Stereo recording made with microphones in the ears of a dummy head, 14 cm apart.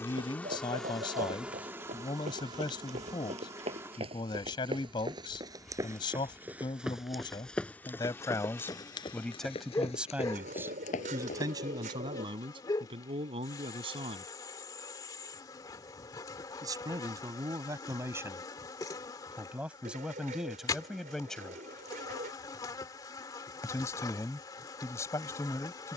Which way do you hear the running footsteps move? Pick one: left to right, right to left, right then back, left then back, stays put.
right to left.